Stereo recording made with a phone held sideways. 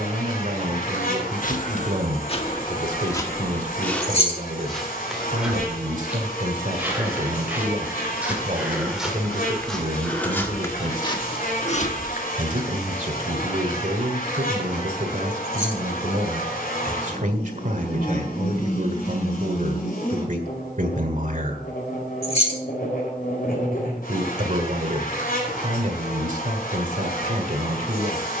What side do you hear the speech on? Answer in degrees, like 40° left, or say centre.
60° right.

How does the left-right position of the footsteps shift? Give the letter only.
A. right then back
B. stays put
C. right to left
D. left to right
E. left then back
A.